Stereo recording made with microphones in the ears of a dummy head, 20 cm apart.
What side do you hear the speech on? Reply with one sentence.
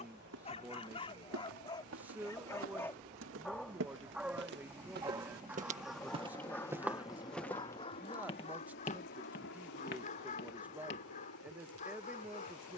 In this clip you hear the speech in the centre.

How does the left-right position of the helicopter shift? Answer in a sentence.
You can hear the helicopter travel towards the left.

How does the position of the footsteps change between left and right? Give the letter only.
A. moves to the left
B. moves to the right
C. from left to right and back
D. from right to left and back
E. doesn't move
A.